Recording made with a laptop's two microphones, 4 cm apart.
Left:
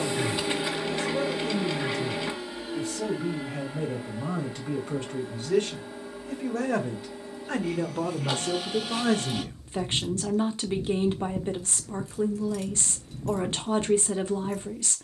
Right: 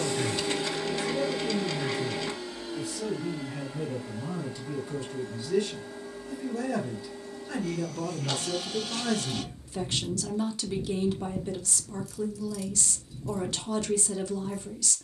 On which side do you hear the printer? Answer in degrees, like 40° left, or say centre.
20° left.